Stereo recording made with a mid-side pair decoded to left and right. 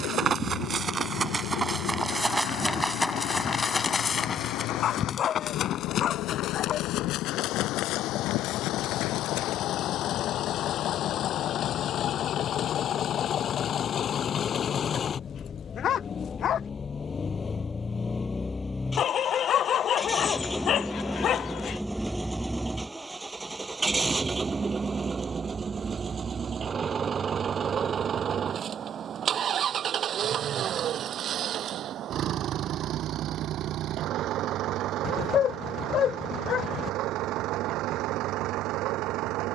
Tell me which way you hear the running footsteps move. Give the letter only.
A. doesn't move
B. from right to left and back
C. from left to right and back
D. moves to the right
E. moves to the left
E.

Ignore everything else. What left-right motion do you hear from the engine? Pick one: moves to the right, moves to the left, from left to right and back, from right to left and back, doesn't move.
moves to the right.